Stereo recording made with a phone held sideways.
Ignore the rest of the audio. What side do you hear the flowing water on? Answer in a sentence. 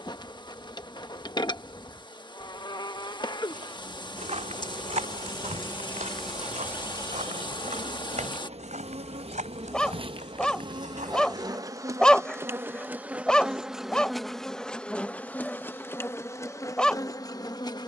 You can hear the flowing water on the left.